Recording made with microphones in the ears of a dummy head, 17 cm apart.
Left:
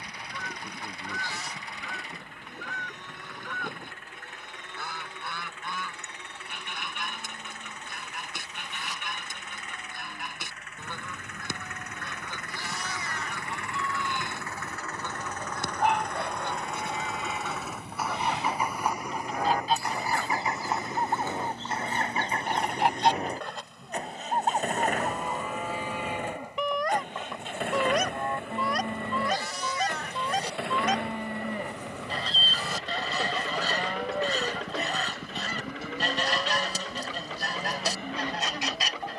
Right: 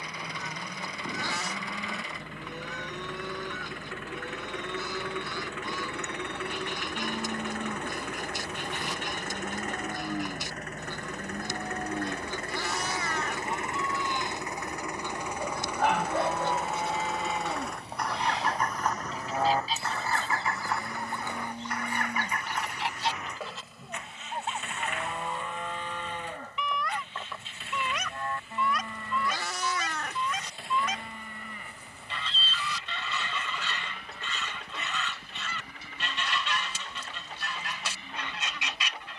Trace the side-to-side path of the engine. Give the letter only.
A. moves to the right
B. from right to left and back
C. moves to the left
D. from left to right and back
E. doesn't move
C.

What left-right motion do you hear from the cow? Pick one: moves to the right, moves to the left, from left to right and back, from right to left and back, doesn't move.
moves to the left.